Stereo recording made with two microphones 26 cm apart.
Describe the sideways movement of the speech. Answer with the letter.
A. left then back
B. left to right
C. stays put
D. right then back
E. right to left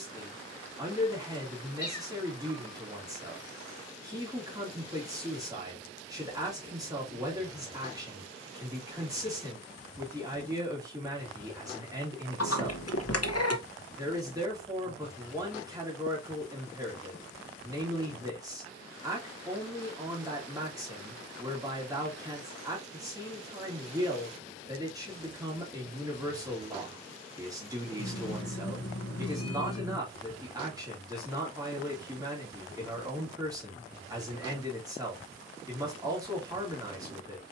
C.